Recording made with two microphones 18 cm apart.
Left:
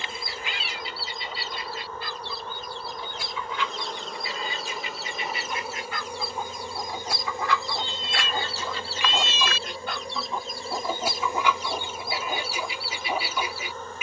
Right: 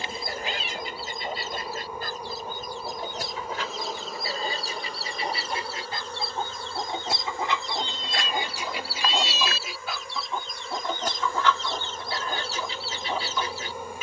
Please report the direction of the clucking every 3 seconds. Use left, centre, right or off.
right, right, right, centre, centre.